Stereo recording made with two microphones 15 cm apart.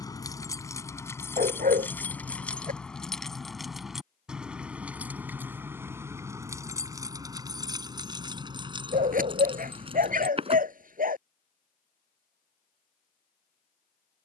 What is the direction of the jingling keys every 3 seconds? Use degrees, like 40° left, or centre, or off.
10° left, 10° right, 20° right, 40° right, off.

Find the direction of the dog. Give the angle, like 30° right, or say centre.
60° right.